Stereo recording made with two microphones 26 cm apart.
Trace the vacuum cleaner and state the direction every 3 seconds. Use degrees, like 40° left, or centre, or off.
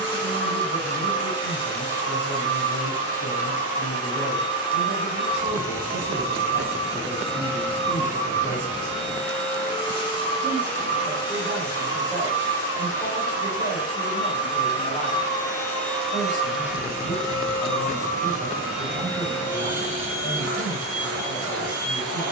20° left, 20° left, 20° left, 20° left, 20° left, centre, 40° right, 60° right.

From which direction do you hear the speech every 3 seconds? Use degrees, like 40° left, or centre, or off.
50° right, 50° right, 40° right, centre, 30° left, 30° left, 30° left, 30° left.